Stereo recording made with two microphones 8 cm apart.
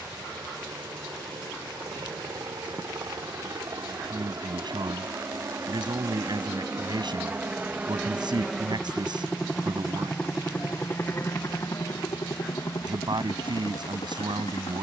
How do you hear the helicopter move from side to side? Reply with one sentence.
You can hear the helicopter move to the left.